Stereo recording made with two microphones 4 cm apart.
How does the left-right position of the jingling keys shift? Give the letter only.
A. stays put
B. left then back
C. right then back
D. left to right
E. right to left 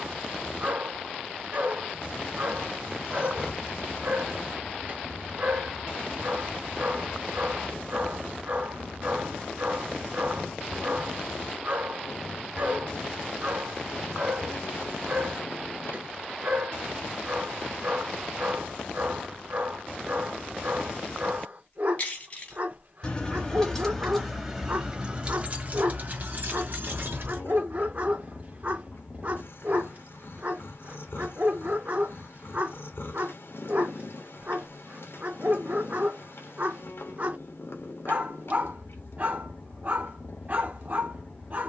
D.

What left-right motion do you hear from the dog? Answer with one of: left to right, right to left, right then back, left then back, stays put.
stays put.